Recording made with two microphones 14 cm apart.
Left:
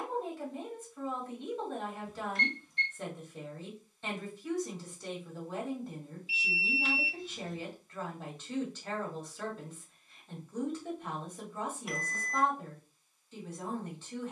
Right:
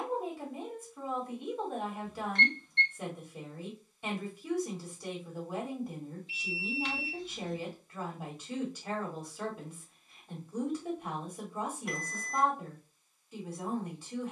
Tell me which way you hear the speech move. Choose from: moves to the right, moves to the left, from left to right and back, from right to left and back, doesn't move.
doesn't move.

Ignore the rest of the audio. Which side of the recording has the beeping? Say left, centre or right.
centre.